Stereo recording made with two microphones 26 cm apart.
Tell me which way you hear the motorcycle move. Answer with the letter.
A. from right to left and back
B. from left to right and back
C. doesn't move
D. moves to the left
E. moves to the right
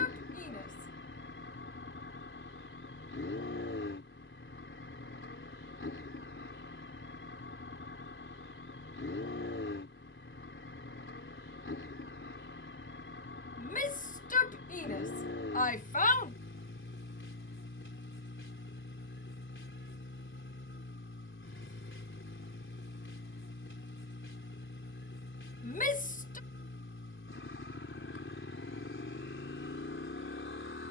C.